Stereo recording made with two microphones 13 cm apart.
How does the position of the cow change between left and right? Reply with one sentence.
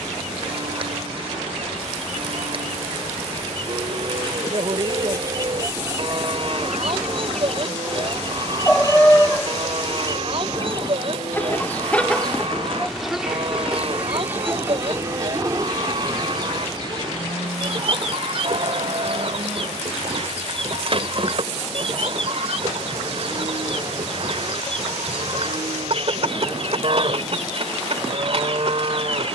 In this clip you hear the cow stay in one place.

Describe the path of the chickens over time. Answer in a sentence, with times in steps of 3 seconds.
You can hear the chickens on the right from 0 s, in the centre from 6 s, on the left from 9 s, in the centre from 12 s and on the right from 15 s.